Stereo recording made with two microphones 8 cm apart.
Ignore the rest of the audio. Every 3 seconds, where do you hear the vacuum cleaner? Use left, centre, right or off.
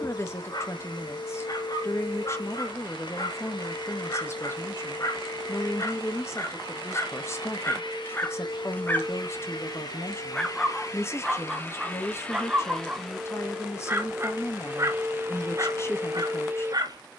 left, left, left, left, centre, right.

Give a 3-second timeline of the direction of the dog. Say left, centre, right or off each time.
left, left, left, centre, right, right.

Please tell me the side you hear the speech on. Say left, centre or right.
left.